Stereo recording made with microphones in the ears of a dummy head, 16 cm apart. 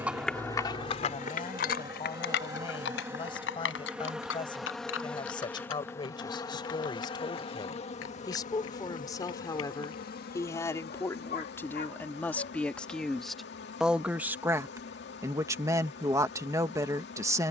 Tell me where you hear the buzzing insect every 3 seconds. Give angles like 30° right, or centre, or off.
20° right, centre, 30° left, 60° left, 60° left, 60° left.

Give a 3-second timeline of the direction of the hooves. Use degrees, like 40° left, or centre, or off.
40° left, 80° left, 80° left, 80° left, off, off.